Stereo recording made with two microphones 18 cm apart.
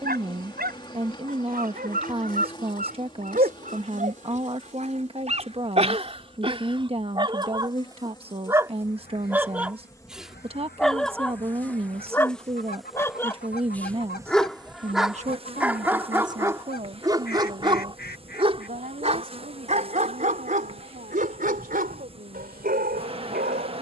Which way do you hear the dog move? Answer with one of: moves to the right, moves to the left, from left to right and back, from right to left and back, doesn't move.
from right to left and back.